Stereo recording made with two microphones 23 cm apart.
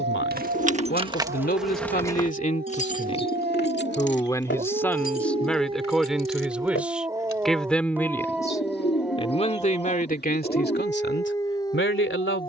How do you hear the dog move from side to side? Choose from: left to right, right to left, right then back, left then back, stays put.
right to left.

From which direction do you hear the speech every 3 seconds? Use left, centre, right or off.
left, centre, centre, left.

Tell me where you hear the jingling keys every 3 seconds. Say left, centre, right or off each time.
centre, left, left, off.